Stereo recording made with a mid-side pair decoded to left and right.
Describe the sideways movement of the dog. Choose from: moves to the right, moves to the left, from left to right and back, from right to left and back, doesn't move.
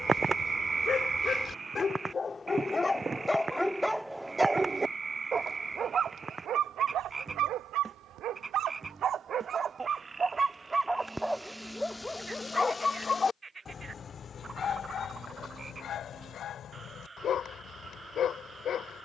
from left to right and back.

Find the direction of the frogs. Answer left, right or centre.
right.